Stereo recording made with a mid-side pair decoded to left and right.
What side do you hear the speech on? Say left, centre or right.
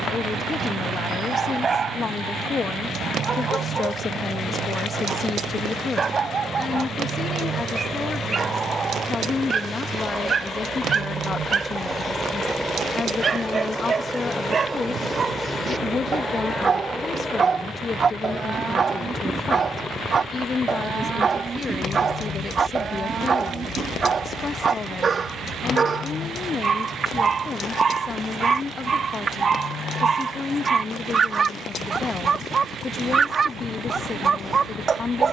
left.